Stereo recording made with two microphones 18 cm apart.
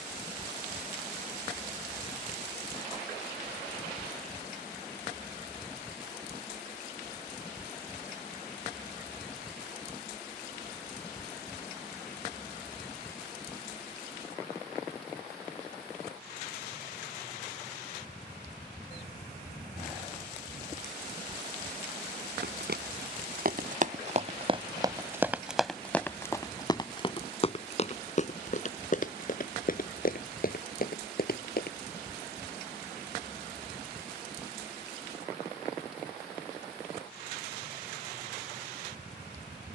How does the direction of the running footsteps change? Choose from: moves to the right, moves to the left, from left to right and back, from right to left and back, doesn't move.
moves to the left.